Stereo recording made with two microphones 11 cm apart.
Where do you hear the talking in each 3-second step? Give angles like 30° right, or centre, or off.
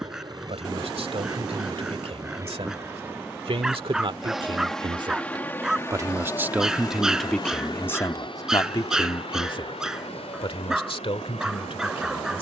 70° right, 50° right, 10° left, 60° left.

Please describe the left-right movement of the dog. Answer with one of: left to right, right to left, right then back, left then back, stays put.
stays put.